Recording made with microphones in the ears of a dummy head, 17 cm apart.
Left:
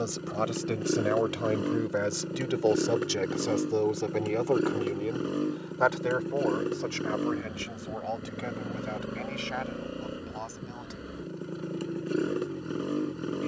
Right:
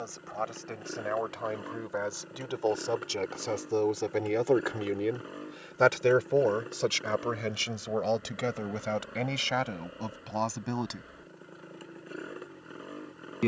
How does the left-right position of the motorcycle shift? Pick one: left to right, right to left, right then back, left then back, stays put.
stays put.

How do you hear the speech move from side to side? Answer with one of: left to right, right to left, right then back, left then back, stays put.
left to right.